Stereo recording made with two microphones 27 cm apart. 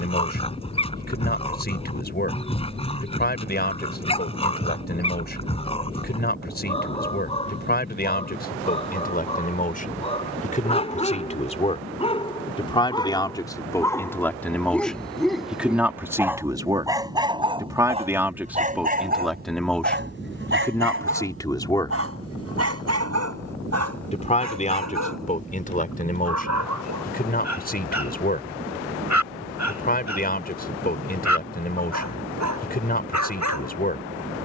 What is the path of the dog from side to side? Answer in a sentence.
In this clip you hear the dog move to the right.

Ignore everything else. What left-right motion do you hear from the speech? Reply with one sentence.
You can hear the speech go right and come back.